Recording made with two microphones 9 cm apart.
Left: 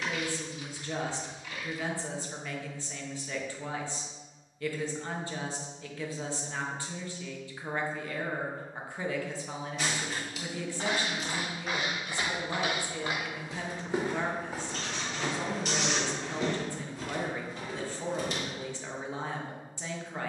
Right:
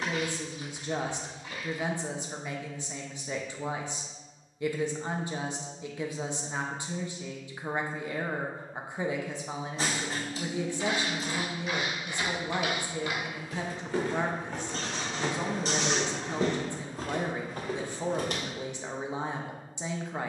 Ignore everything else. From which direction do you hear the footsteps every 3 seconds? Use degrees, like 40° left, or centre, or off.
off, off, off, 50° left, 20° left, 40° right, 60° right.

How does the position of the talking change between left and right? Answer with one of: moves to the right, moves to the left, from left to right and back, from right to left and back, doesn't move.
doesn't move.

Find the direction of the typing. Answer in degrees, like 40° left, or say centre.
30° right.